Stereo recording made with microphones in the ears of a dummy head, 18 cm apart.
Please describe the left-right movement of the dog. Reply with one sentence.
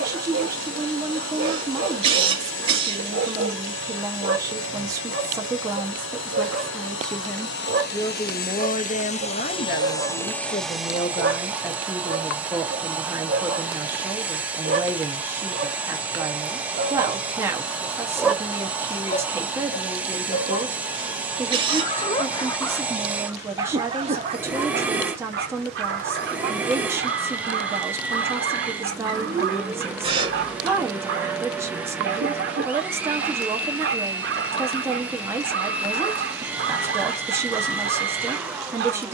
You can hear the dog move from right to left and back again.